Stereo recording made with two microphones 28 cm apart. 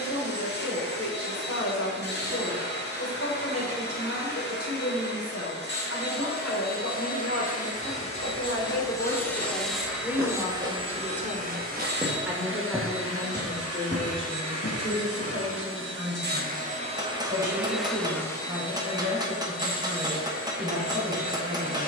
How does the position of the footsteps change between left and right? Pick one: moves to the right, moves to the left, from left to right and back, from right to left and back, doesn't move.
moves to the left.